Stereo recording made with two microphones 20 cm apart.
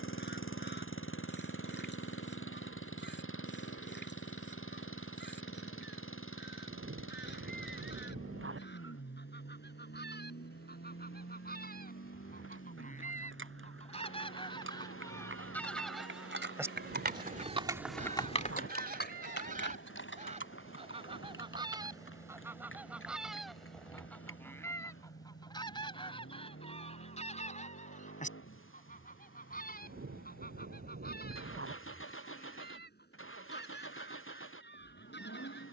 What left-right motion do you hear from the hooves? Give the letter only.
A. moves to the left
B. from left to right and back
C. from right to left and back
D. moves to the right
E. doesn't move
A.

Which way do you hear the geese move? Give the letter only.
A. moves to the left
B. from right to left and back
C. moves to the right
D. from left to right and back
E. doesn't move
D.